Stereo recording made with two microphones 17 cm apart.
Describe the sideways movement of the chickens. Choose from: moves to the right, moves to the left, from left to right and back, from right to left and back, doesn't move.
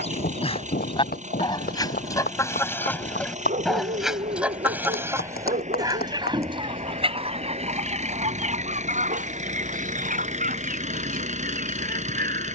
moves to the right.